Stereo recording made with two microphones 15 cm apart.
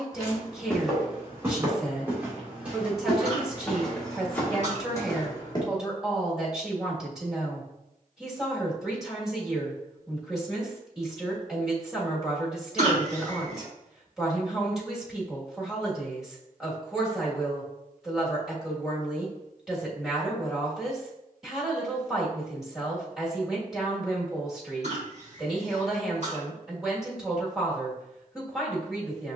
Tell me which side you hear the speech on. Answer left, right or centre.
centre.